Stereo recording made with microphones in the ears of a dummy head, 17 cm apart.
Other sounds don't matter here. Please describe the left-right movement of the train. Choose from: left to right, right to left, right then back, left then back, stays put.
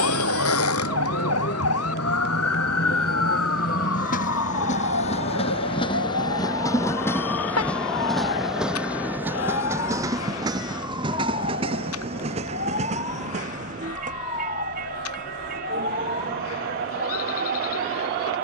left to right.